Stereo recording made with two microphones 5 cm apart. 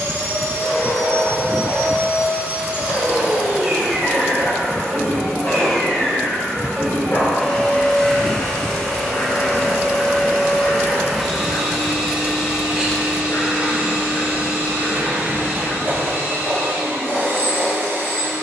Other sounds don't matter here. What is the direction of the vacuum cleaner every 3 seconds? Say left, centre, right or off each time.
right, centre, centre, centre, right, right.